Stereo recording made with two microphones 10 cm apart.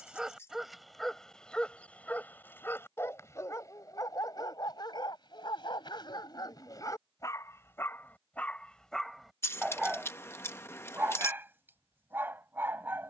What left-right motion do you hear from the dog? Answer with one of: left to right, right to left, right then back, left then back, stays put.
left then back.